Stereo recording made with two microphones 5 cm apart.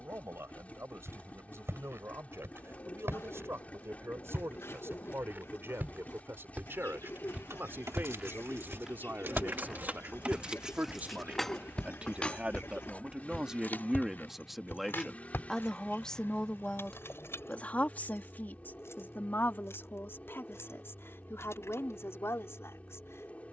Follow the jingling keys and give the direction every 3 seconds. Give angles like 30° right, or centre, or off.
off, off, 60° right, 20° right, 40° left, 50° left, 60° left, 60° left.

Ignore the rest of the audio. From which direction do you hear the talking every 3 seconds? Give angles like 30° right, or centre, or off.
60° right, 60° right, 50° right, 40° right, 10° right, 20° left, 40° left, 60° left.